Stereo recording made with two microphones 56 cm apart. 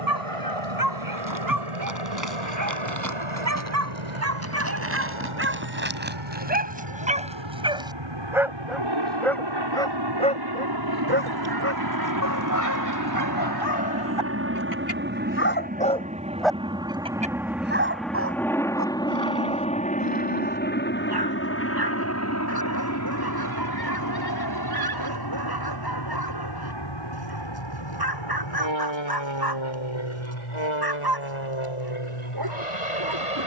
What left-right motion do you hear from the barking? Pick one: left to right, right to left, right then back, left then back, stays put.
left then back.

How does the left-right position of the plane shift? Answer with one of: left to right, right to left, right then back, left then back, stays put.
right to left.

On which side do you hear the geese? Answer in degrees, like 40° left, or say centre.
40° right.